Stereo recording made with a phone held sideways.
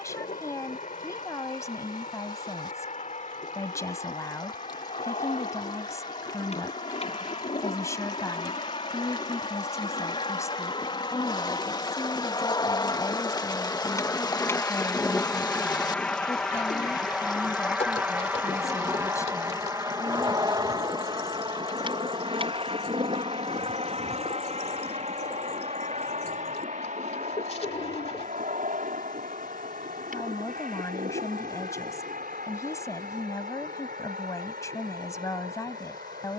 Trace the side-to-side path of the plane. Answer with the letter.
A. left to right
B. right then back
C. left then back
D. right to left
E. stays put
A.